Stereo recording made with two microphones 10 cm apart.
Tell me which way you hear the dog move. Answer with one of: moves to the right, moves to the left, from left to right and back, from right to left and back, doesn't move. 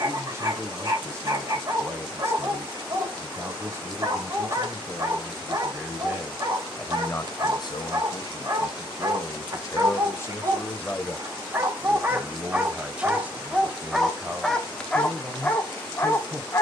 moves to the left.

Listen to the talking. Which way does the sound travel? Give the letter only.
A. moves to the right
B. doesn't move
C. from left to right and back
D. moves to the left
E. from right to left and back
E.